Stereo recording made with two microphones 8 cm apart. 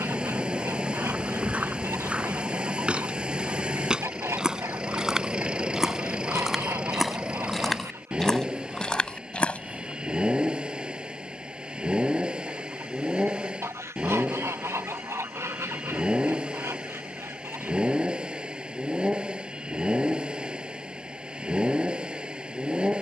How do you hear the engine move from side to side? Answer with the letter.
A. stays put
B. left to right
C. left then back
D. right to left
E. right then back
A.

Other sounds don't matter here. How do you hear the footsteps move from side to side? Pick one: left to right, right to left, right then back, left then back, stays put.
right to left.